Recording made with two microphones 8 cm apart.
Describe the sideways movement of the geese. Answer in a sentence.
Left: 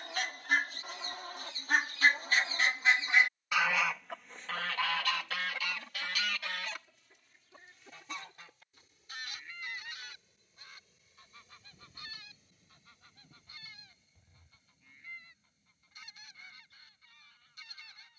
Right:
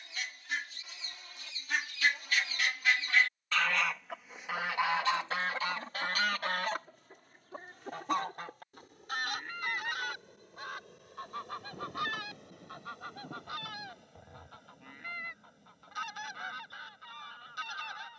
In this clip you hear the geese move to the right.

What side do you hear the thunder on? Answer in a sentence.
In this clip you hear the thunder on the right.